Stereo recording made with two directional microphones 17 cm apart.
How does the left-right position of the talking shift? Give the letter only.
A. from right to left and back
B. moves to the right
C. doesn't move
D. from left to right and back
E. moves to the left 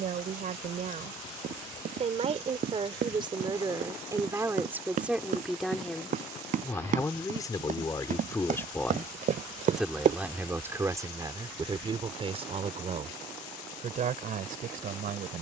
A.